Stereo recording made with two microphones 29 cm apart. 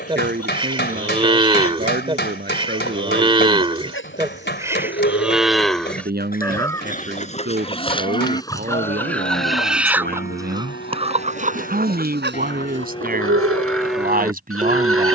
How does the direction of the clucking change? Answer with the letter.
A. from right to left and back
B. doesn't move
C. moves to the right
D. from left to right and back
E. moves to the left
C.